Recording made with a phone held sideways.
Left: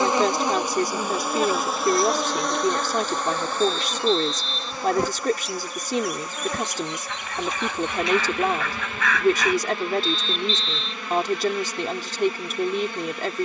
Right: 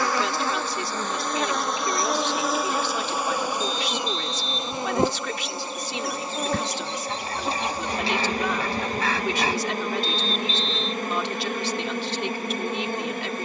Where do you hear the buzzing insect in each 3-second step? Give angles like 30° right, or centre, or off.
10° left, 20° right, 30° right, 40° right, 50° right.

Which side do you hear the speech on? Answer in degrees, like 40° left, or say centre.
40° left.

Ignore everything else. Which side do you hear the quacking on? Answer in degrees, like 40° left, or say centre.
30° right.